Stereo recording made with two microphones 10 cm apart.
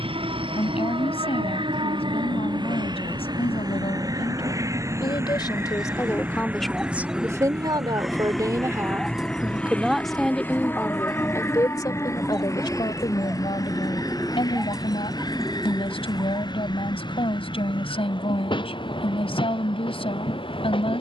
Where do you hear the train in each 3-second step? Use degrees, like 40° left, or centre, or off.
50° right, 30° right, 10° right, 20° left, 30° left, 40° left, 50° left.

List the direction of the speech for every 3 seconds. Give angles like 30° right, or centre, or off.
60° left, 50° left, 20° right, 10° left, 50° left, 60° left, 60° left.